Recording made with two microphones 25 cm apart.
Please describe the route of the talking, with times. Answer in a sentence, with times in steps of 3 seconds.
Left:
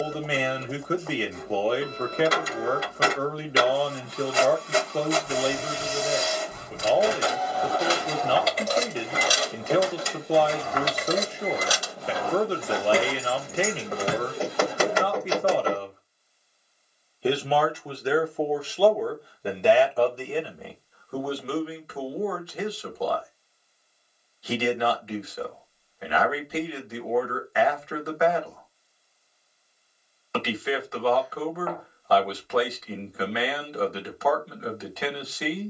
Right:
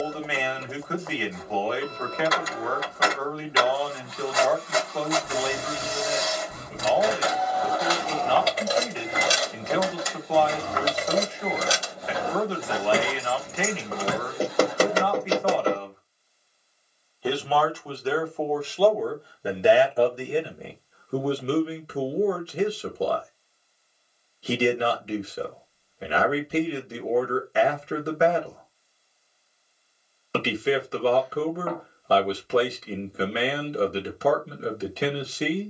You can hear the talking on the left from 0 s, in the centre from 18 s and on the right from 21 s.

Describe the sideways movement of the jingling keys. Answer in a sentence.
In this clip you hear the jingling keys move from left to right and back again.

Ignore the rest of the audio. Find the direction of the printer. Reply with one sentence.
You can hear the printer on the left.